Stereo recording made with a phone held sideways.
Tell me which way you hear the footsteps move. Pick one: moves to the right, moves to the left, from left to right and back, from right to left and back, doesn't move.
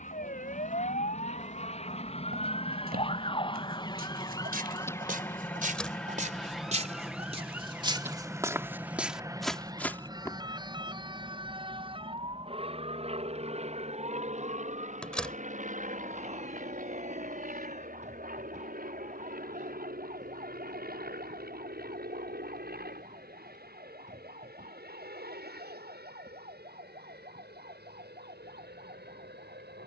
moves to the left.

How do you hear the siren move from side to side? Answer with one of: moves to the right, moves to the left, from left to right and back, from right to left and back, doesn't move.
moves to the right.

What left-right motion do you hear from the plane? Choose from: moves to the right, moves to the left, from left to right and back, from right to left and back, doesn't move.
moves to the right.